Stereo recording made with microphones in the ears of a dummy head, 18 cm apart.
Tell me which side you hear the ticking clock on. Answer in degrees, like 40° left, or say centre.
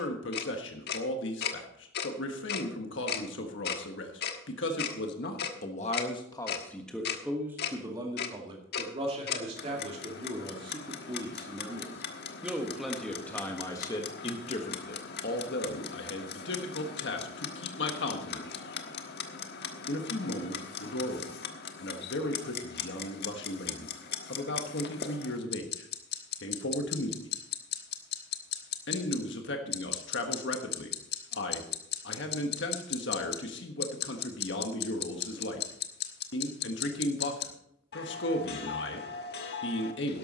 60° left.